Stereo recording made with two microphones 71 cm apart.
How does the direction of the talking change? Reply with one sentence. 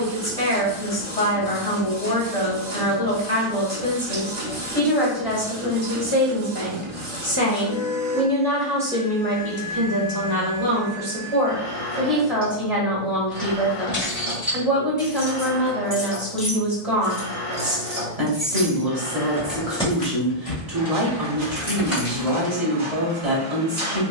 In this clip you hear the talking travel towards the right.